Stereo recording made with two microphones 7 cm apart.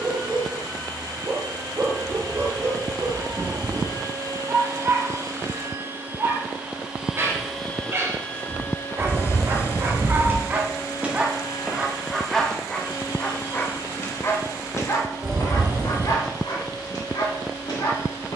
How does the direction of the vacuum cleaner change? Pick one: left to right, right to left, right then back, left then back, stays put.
right to left.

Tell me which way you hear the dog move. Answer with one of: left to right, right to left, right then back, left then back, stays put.
right to left.